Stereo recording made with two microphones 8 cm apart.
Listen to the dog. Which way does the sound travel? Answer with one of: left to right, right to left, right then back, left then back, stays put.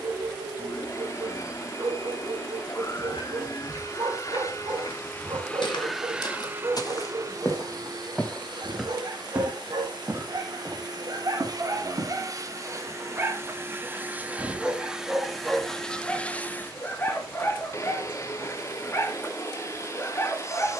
right to left.